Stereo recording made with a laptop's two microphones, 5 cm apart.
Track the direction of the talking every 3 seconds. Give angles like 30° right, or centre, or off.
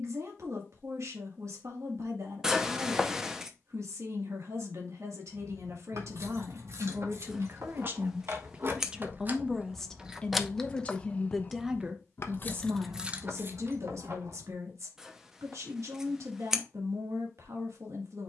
70° right, 70° right, 40° right, 10° left, 60° right, 70° right.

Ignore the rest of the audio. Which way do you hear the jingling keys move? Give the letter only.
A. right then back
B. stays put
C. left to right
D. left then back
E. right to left
D.